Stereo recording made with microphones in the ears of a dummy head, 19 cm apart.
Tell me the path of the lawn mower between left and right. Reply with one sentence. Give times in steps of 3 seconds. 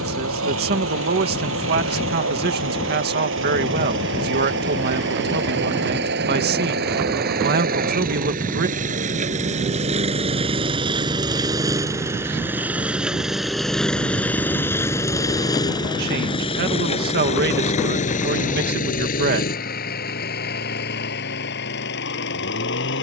You can hear the lawn mower on the right from 0 s, in the centre from 12 s and on the left from 15 s.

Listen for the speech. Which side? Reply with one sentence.
In this clip you hear the speech on the right.